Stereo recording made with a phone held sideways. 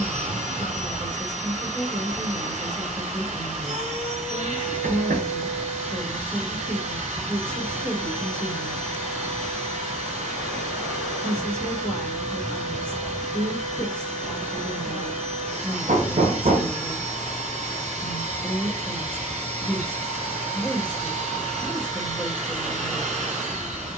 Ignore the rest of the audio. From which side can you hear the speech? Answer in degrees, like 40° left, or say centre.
10° left.